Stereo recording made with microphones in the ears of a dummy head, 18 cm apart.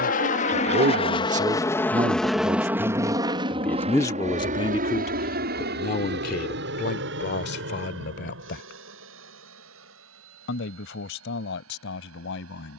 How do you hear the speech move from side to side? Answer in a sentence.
You can hear the speech go from the right side to the left.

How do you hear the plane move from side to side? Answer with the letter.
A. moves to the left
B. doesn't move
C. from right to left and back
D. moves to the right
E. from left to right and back
D.